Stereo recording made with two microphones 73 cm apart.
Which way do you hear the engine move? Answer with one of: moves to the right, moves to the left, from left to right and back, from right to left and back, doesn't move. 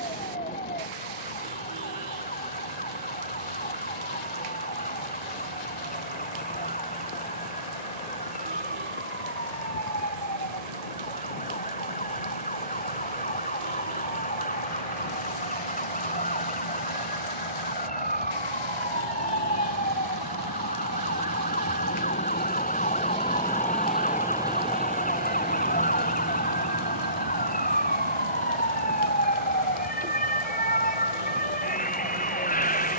moves to the right.